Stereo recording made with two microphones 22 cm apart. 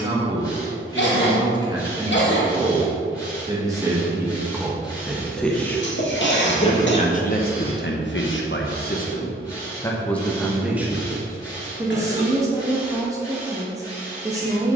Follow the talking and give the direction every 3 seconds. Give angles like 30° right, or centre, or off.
20° right, 10° right, 40° left, centre, 10° right.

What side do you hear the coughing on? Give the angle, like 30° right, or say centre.
60° left.